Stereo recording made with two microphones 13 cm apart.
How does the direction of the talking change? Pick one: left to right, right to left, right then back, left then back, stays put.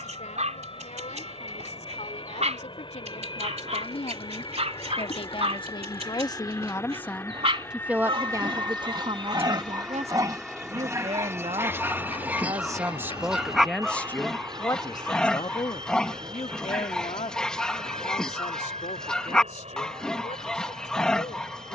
right then back.